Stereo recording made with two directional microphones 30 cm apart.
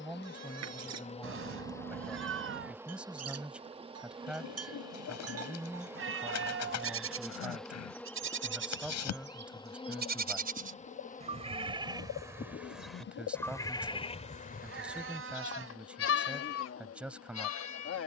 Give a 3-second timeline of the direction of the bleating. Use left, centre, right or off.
right, right, right, right, centre, left.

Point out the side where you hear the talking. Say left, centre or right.
centre.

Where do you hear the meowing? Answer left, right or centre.
right.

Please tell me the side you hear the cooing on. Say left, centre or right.
left.